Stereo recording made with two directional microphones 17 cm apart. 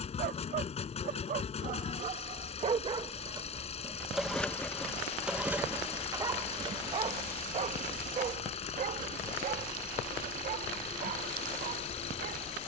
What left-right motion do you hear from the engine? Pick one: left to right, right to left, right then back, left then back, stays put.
stays put.